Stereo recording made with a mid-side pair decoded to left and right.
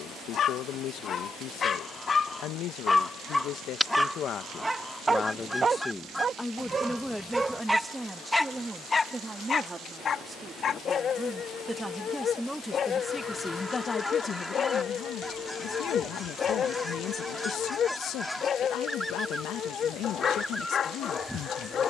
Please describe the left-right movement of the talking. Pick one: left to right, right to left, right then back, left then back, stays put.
right then back.